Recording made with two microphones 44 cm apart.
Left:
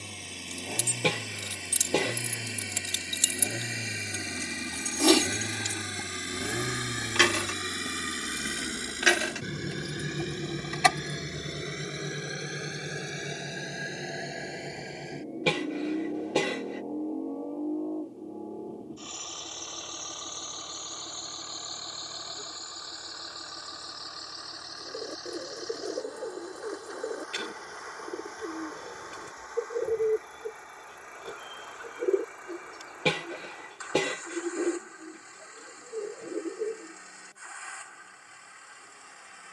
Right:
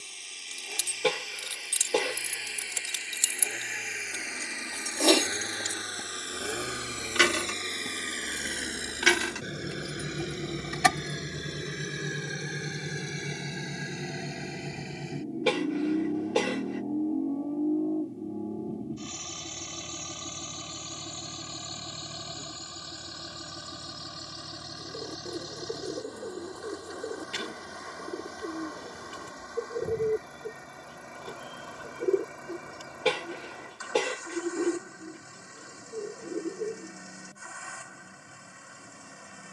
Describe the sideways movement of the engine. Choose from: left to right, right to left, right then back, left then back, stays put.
left to right.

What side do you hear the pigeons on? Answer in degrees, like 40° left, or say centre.
10° right.